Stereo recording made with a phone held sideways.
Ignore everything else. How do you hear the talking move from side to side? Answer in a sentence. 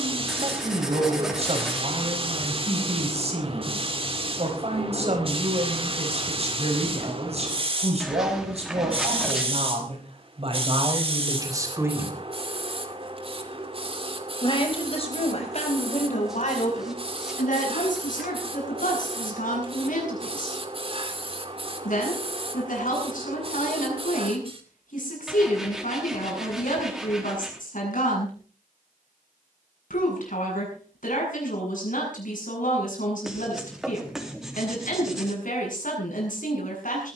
You can hear the talking go from the right side to the left.